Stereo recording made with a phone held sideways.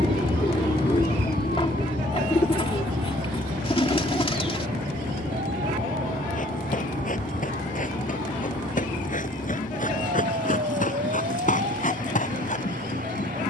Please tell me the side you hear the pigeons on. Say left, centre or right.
left.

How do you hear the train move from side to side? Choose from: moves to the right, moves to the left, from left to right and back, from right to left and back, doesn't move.
doesn't move.